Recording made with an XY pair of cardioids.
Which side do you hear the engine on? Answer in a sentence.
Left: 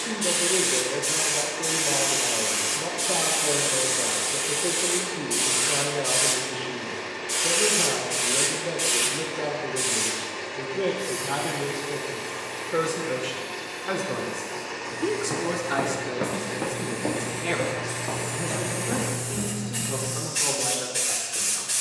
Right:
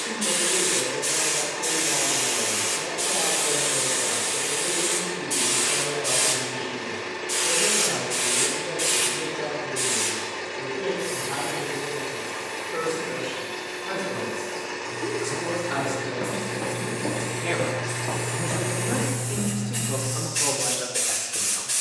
You can hear the engine on the right.